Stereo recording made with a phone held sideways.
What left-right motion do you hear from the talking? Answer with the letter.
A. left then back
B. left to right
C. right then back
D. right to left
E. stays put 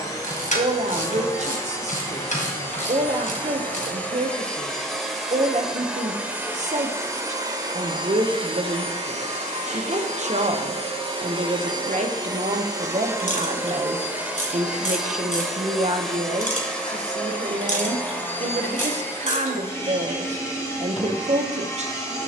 E.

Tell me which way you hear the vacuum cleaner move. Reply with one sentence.
In this clip you hear the vacuum cleaner move from left to right and back again.